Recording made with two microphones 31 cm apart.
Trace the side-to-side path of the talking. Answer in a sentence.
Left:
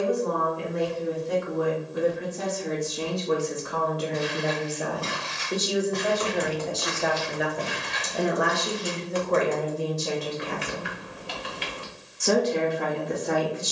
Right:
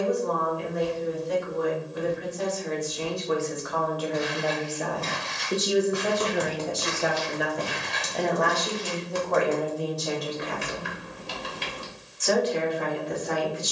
You can hear the talking move from left to right and back again.